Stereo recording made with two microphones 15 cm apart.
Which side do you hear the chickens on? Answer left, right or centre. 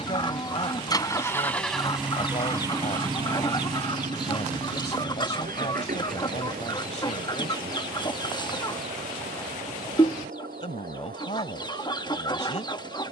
left.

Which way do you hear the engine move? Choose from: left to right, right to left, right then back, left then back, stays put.
left to right.